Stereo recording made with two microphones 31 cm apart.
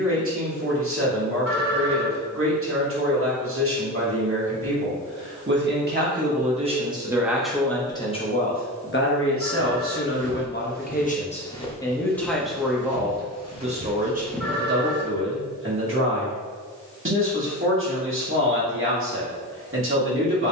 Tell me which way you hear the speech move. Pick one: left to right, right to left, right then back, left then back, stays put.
left then back.